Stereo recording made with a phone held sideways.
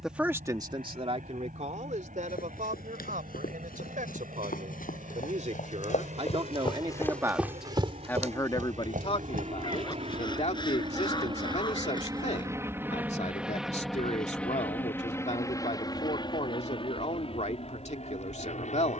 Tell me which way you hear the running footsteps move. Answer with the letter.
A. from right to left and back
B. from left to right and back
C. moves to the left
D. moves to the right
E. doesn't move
D.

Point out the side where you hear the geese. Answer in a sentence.
In this clip you hear the geese on the left.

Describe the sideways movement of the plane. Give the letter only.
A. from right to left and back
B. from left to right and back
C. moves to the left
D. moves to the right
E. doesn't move
C.